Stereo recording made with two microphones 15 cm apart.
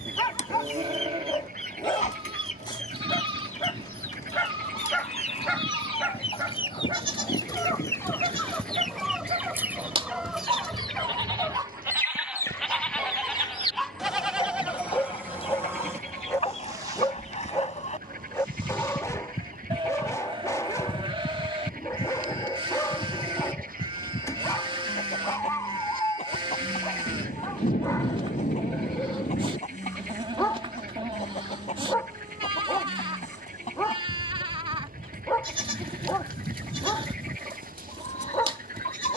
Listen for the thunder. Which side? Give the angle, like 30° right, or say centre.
70° left.